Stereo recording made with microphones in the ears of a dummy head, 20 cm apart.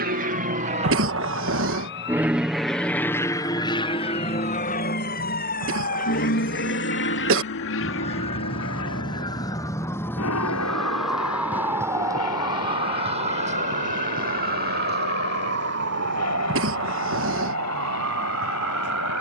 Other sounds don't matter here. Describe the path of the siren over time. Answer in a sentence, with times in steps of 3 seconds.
In this clip you hear the siren on the left from 0 s, in the centre from 9 s and on the right from 12 s.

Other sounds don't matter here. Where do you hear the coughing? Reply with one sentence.
In this clip you hear the coughing on the right.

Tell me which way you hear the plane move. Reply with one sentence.
You can hear the plane travel towards the left.